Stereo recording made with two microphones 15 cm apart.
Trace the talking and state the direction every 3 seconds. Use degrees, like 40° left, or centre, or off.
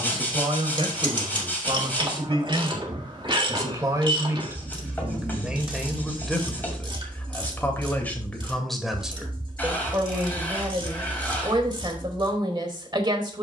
40° right, 20° right, 10° left, 20° right, 30° right.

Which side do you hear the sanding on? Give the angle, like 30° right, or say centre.
10° left.